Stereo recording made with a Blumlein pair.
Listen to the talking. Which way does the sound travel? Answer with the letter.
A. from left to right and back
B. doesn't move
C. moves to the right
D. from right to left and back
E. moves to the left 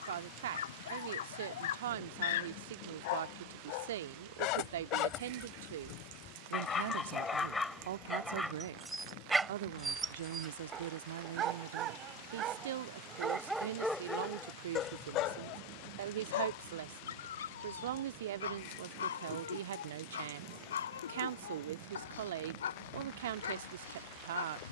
B.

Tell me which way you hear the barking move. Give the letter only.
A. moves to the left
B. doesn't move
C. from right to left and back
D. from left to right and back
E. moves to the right
D.